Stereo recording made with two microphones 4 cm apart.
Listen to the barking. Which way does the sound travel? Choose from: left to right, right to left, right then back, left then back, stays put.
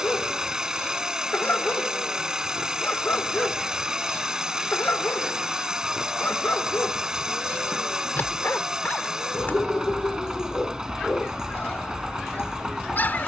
stays put.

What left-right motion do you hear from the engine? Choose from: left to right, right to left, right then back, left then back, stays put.
stays put.